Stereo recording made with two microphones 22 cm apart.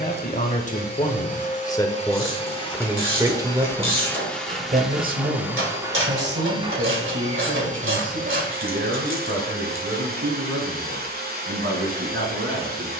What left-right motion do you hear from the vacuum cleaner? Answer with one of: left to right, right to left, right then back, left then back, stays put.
left to right.